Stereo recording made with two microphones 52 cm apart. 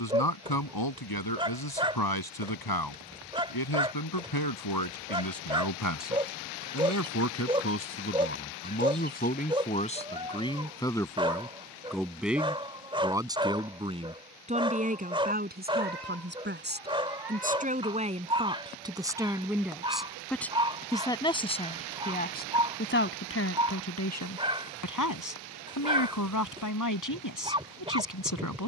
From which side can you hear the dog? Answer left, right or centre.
centre.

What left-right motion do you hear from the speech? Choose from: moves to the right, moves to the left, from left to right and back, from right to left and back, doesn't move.
from left to right and back.